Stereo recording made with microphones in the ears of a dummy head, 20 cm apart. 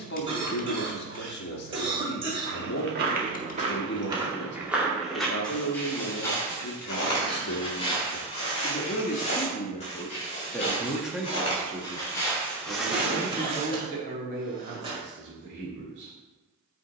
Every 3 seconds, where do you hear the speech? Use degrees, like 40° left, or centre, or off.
50° left, 50° left, 50° left, 10° left, 40° right, 50° right.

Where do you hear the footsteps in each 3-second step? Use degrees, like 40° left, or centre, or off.
50° right, 10° right, 20° left, 30° left, centre, off.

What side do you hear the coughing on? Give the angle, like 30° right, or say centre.
20° right.